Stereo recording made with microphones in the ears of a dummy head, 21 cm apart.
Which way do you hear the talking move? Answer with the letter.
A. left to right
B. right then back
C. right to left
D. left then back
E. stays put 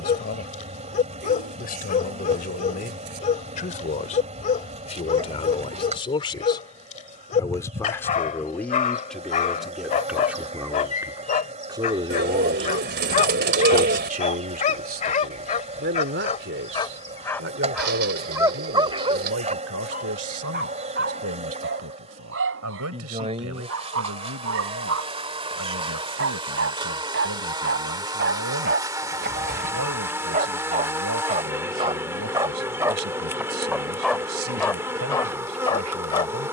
A.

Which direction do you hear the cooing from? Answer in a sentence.
In this clip you hear the cooing on the right.